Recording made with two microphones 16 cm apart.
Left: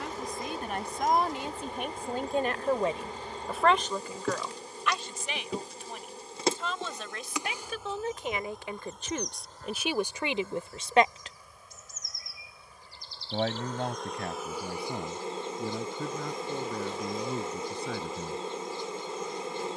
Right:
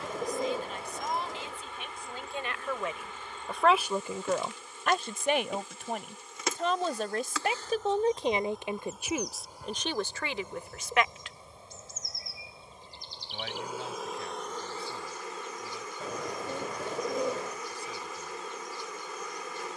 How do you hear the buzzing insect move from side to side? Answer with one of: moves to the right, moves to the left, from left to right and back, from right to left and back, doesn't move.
from left to right and back.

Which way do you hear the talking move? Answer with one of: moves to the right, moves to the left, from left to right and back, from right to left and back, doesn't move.
from left to right and back.